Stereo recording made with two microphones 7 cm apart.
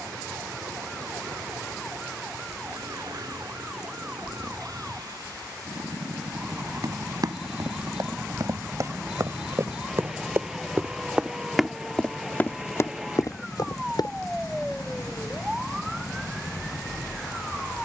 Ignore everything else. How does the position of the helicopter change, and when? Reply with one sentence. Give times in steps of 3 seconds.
You can hear the helicopter on the right from 0 s, in the centre from 9 s and on the left from 12 s.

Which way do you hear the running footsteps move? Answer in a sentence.
In this clip you hear the running footsteps move from right to left.